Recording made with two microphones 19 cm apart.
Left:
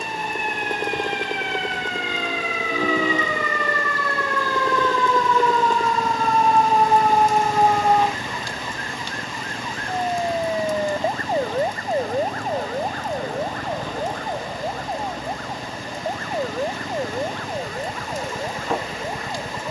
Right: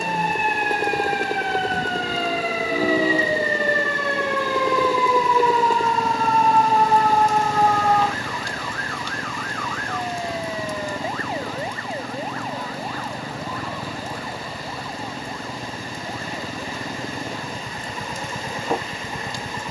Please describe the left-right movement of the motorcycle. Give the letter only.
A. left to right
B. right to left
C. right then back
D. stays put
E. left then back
D.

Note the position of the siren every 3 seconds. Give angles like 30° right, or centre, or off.
50° right, 20° right, 10° left, 30° left, 50° left, 50° left, 60° left.